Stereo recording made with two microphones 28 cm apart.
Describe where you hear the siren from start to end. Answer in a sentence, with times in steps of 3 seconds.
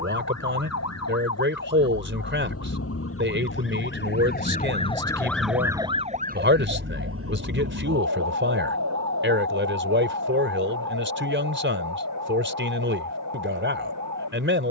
You can hear the siren on the left from 0 s and on the right from 6 s.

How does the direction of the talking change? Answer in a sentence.
You can hear the talking stay put.